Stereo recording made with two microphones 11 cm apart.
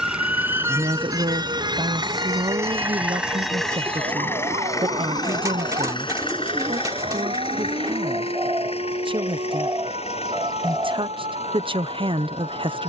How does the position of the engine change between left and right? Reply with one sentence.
You can hear the engine move to the left.